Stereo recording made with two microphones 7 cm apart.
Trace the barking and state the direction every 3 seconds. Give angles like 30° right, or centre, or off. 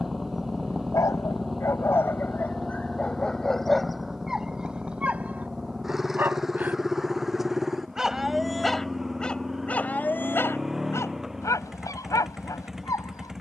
40° left, centre, 10° right, 30° left, 50° left.